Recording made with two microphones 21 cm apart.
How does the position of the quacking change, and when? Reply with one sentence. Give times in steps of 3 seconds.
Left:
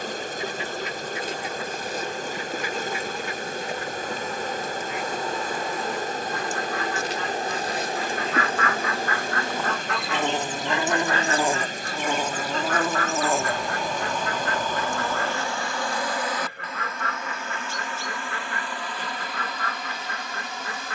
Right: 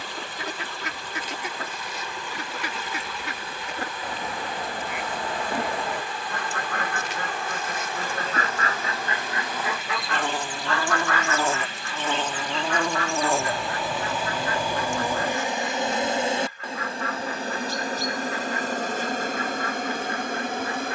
You can hear the quacking on the right from 0 s, in the centre from 9 s and on the left from 12 s.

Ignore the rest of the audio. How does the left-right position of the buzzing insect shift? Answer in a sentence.
You can hear the buzzing insect go from the left side to the right.